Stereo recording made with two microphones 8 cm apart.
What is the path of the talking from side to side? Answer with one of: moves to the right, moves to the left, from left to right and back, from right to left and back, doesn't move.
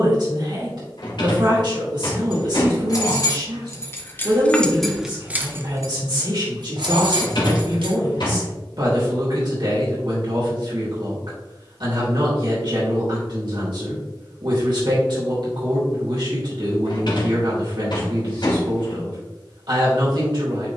doesn't move.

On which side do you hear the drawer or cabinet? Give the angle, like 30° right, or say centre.
60° left.